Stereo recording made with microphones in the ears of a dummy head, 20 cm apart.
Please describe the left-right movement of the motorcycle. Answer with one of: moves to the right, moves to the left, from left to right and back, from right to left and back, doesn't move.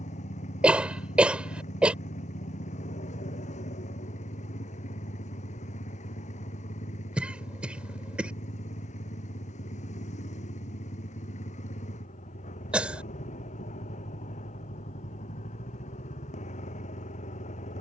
doesn't move.